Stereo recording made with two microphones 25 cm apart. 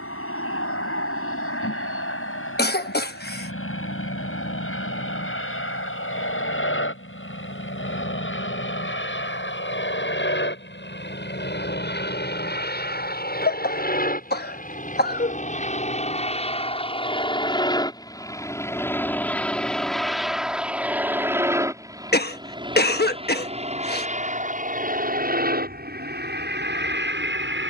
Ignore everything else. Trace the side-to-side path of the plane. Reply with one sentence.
You can hear the plane travel towards the right.